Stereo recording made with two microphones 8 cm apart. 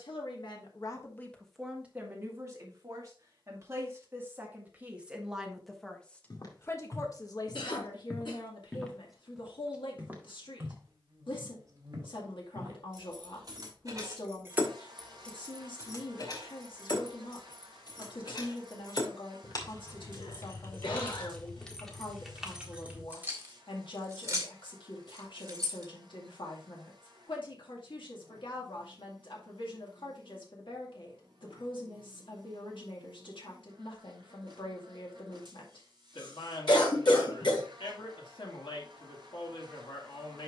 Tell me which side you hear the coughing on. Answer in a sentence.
In this clip you hear the coughing on the left.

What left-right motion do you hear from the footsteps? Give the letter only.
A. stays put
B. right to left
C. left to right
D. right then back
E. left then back
C.